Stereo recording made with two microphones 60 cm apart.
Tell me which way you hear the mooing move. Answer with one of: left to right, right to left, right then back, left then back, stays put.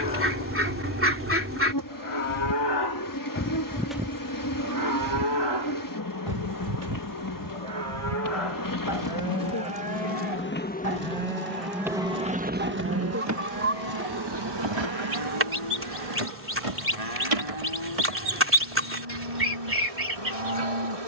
left to right.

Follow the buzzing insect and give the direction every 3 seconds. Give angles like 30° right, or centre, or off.
30° left, 30° left, 30° left, 20° left, 30° right, 60° right, 70° right.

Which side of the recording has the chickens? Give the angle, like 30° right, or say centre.
20° right.